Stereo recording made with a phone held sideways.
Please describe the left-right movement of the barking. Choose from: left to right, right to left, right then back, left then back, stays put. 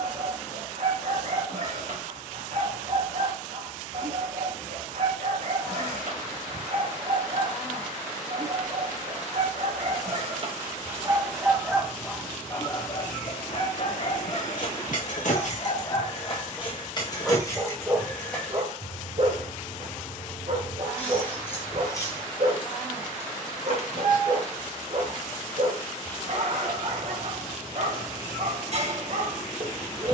left then back.